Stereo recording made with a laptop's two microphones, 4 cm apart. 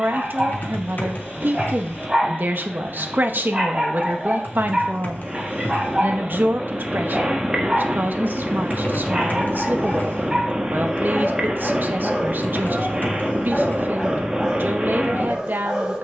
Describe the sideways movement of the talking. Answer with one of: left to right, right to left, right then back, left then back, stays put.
stays put.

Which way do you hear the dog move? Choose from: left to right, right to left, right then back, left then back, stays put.
stays put.